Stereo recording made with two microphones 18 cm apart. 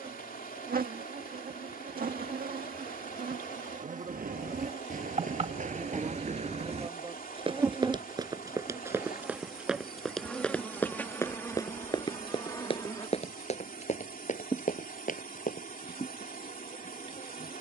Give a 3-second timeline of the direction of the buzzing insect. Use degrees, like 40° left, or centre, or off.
60° right, 40° right, 20° right, 10° left, 20° left, 30° left.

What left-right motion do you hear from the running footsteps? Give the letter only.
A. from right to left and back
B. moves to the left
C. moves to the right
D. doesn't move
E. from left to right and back
B.